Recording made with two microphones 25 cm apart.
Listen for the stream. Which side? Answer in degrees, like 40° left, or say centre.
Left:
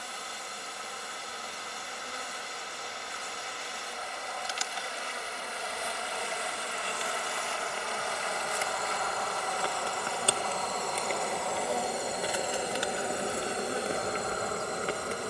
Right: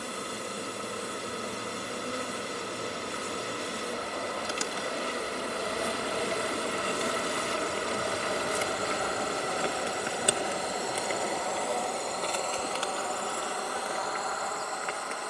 70° right.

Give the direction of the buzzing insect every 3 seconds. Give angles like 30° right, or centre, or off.
60° right, 60° right, 40° right, 10° right, 20° left.